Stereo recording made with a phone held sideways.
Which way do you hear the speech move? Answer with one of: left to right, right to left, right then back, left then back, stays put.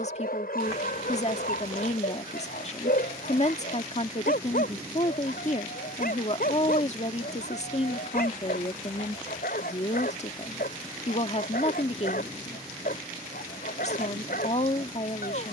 stays put.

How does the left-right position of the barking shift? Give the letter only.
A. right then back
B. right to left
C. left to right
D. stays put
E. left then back
D.